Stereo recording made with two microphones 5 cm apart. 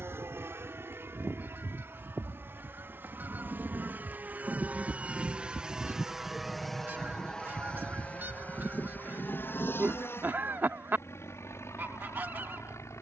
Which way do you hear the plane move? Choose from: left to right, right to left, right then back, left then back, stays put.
right to left.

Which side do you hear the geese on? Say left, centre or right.
right.